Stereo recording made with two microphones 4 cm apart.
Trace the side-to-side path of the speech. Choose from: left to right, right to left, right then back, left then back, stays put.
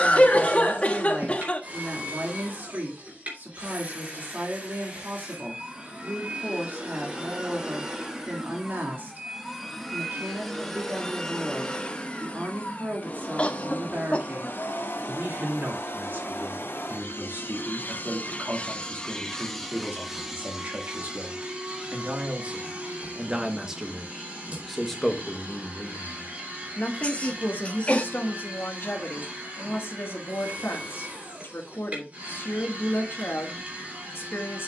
right to left.